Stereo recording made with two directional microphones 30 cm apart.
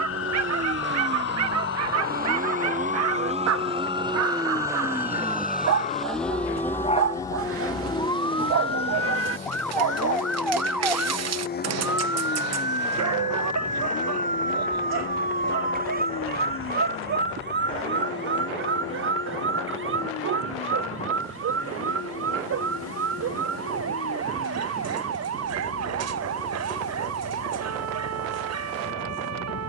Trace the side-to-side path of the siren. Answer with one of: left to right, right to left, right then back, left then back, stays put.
left to right.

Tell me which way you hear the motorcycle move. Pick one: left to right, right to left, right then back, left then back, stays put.
right to left.